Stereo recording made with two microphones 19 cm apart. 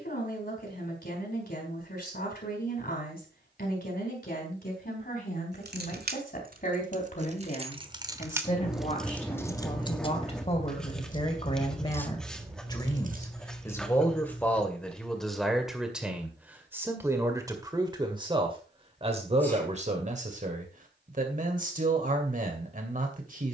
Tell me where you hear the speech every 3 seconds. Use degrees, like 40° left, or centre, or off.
50° left, 50° left, 40° left, 30° left, 10° left, 10° right, 30° right, 40° right.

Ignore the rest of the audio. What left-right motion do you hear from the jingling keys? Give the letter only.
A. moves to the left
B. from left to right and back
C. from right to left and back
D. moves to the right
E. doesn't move
C.